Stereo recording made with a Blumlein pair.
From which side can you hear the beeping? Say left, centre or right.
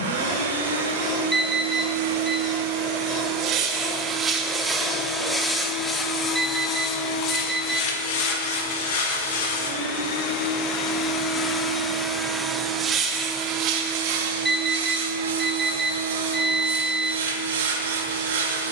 centre.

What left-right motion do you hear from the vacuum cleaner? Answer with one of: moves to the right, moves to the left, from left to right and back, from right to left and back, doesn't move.
from right to left and back.